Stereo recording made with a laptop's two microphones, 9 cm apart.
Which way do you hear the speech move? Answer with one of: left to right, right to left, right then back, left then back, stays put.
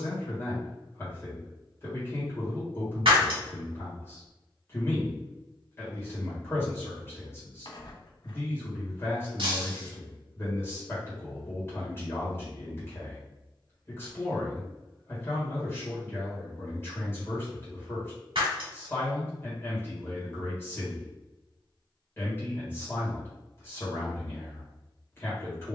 stays put.